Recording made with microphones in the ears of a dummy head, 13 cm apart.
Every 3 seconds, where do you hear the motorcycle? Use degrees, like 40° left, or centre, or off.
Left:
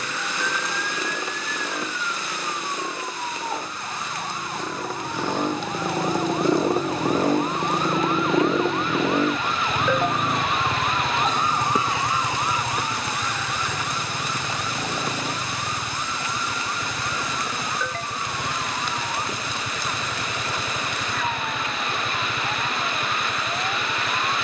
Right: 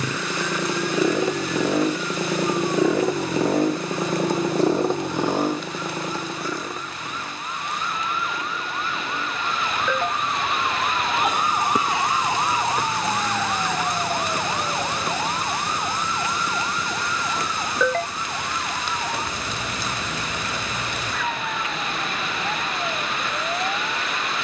70° right, 30° right, 30° left, 60° left, 70° left, 70° left, 70° left, 70° left.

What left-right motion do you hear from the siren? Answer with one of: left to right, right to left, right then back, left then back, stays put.
left to right.